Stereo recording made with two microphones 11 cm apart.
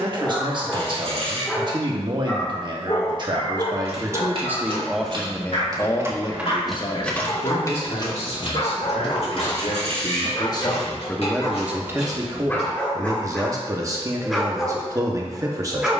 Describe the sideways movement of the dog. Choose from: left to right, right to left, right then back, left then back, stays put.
left then back.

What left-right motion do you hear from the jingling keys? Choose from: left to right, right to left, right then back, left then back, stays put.
right to left.